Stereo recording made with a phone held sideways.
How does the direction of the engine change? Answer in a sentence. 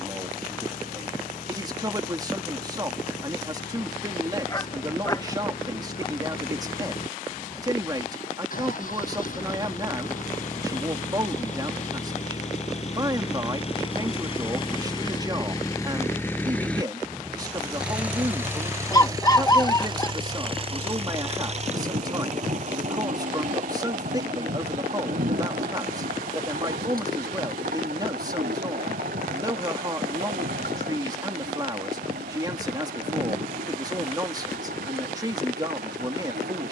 You can hear the engine move from left to right.